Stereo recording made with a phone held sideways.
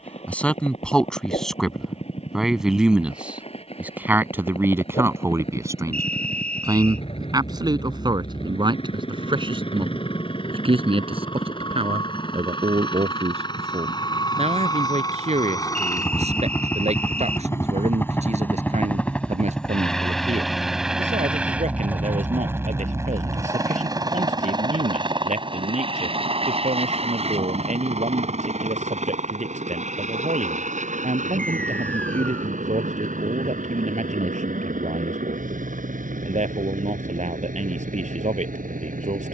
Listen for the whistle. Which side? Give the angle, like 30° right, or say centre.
10° left.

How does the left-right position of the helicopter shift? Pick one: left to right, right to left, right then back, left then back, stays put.
left to right.